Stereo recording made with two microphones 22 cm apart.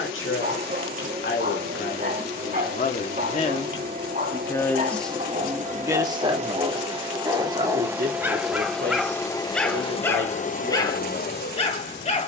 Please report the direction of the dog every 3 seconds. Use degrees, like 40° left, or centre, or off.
40° right, 40° right, 20° right, 10° left.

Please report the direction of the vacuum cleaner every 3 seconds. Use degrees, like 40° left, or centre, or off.
40° right, 40° right, 20° right, 30° left.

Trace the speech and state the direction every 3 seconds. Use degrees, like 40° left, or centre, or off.
50° left, 10° left, 40° right, 60° right.